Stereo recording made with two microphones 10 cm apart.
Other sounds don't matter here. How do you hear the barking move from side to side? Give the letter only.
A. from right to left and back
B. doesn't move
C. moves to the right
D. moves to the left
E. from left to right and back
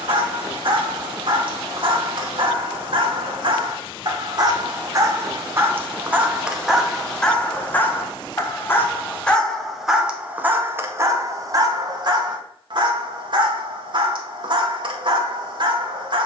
A.